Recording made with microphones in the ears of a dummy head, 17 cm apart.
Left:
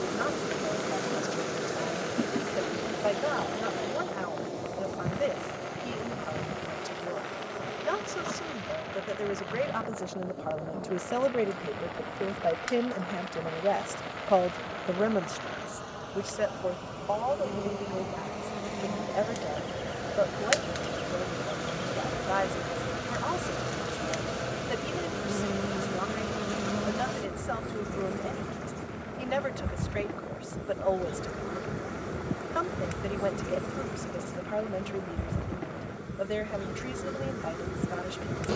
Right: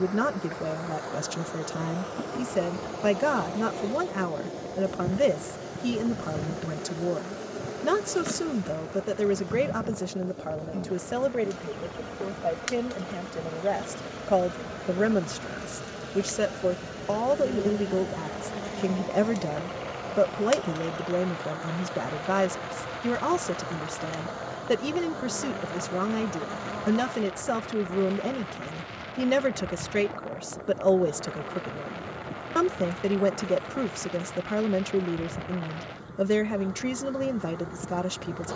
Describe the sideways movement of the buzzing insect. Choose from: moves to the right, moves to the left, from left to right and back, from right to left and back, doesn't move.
from left to right and back.